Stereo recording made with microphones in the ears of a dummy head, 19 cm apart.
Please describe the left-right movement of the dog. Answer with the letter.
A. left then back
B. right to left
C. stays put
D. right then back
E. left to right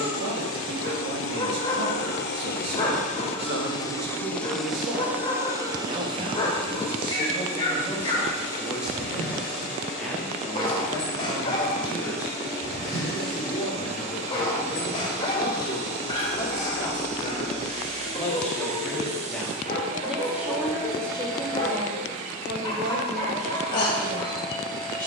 C.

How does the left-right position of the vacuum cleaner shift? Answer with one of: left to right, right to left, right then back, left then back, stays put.
left to right.